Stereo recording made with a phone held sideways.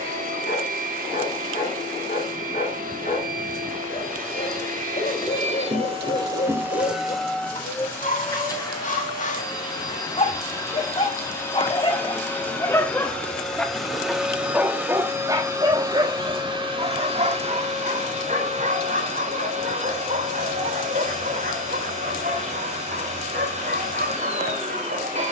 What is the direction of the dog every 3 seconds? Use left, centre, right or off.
left, left, left, left, centre, right, right, right, right.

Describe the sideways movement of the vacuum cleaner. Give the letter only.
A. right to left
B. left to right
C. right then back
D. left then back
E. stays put
D.